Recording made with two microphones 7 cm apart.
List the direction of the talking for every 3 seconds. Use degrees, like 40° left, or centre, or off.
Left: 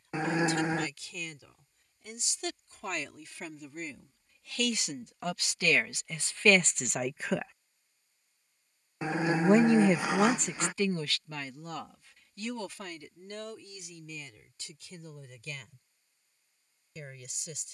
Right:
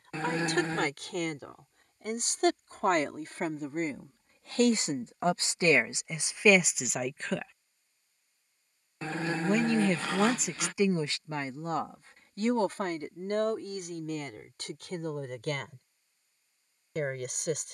60° right, 40° right, 10° right, 10° right, 50° right, 60° right.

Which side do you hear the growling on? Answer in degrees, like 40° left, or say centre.
10° left.